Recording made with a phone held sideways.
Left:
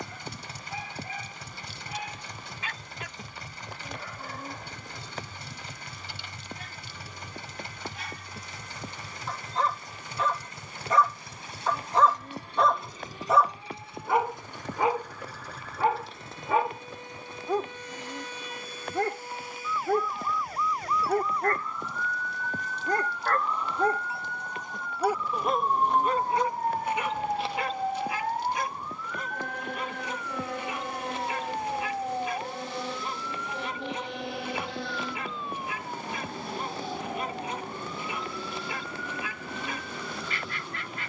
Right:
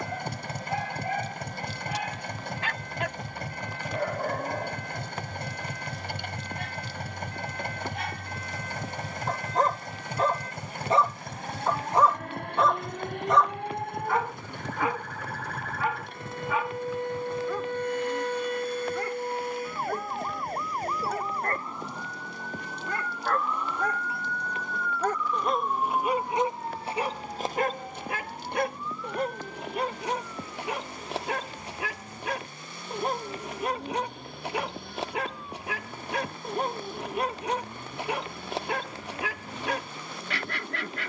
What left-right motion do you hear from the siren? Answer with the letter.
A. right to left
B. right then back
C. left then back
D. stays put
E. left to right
A.